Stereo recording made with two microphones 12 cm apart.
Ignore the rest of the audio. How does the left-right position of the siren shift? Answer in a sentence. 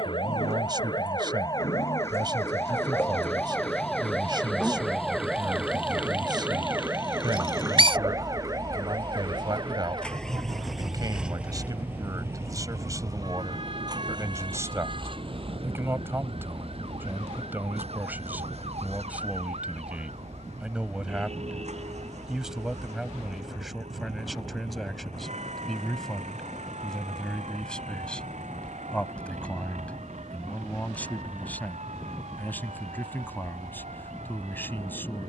You can hear the siren move from left to right.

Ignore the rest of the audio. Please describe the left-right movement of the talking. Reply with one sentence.
In this clip you hear the talking move from right to left.